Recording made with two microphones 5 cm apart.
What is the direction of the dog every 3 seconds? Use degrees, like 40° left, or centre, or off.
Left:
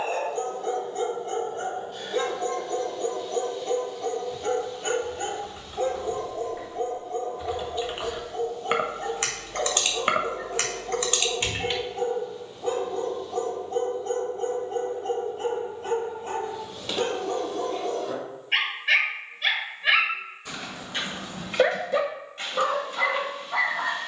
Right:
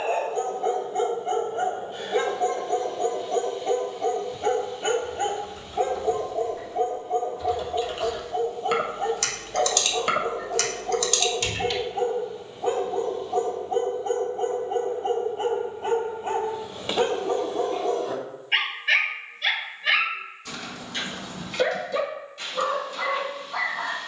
20° right, 20° right, 20° right, 20° right, 20° right, 20° right, 10° left, 40° left.